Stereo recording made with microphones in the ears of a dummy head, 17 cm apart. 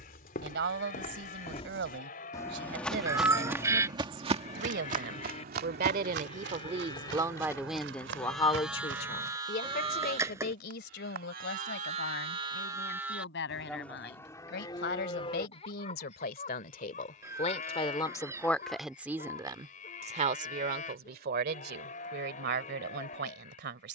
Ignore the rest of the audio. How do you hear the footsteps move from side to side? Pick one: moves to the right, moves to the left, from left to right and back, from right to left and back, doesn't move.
moves to the right.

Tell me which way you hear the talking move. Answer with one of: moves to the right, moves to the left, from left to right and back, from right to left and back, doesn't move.
from right to left and back.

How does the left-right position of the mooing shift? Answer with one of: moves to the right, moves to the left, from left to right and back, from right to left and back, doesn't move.
from left to right and back.